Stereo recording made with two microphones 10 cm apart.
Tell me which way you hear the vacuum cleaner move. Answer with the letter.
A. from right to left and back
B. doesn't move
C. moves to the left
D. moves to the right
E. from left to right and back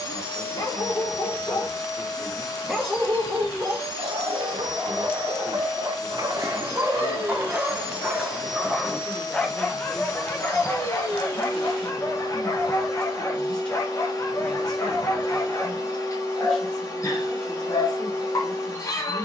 B.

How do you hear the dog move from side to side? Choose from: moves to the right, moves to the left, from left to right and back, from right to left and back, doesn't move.
from left to right and back.